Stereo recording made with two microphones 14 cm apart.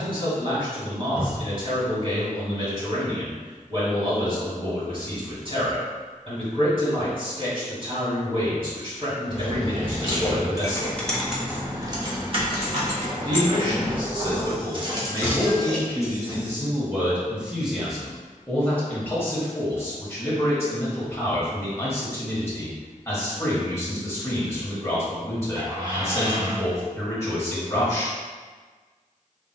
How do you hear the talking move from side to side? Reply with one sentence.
In this clip you hear the talking go from the right side to the left.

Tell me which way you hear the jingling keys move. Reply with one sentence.
You can hear the jingling keys go right and come back.